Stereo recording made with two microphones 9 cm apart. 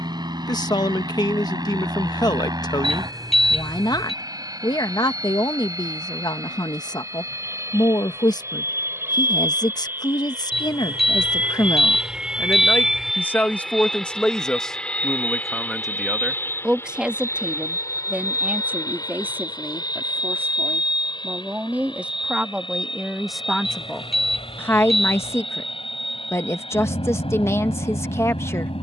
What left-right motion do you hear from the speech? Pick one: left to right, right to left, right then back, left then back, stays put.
right then back.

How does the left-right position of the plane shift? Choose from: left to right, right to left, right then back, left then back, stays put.
right to left.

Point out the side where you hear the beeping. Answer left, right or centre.
centre.